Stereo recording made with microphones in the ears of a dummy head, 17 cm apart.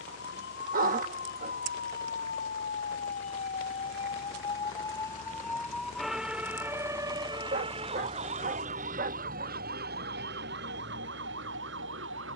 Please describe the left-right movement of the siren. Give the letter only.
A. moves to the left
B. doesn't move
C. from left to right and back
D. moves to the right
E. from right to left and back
D.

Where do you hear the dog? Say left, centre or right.
right.